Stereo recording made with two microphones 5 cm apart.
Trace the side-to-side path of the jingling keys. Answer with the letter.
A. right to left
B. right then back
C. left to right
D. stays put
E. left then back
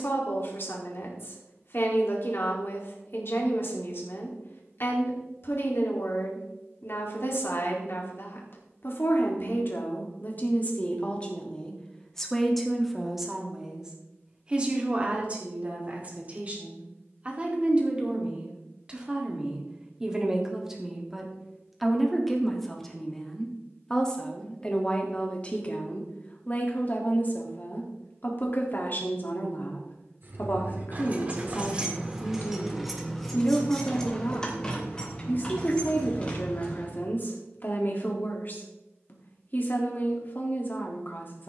A.